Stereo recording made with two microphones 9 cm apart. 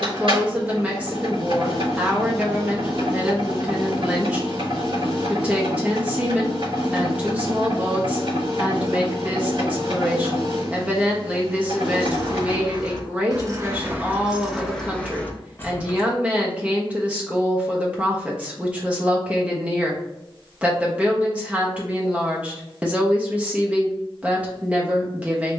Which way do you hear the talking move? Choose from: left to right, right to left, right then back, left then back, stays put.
stays put.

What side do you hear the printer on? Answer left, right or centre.
right.